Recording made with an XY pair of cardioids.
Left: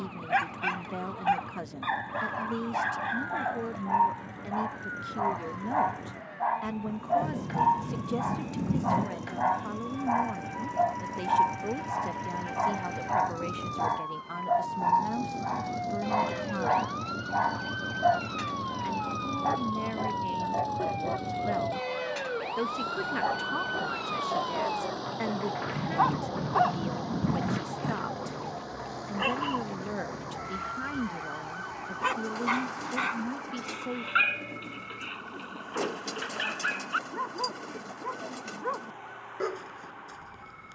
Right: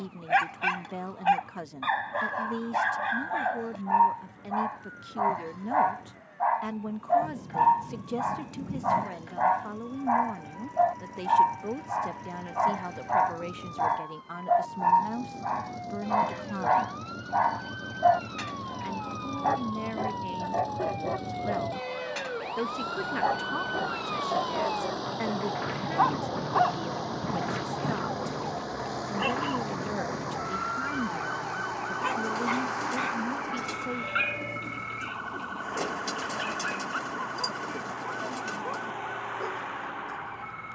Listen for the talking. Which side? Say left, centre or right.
centre.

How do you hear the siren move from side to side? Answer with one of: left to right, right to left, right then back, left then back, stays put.
left to right.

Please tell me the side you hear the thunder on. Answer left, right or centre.
left.